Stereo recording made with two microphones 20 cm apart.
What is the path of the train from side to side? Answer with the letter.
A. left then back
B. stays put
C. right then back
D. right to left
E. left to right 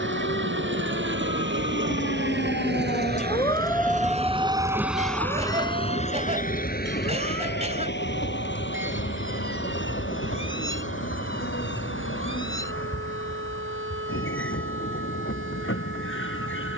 D.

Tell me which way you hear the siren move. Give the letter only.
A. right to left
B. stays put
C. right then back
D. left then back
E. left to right
E.